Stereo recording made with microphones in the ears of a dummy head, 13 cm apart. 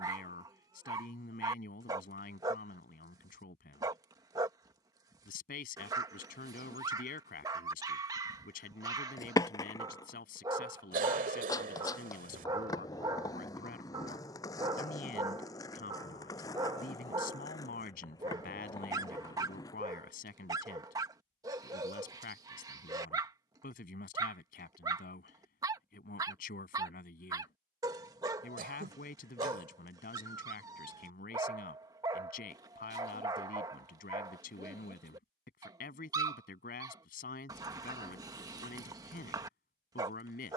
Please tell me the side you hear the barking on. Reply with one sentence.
You can hear the barking on the right.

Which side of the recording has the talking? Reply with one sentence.
In this clip you hear the talking on the left.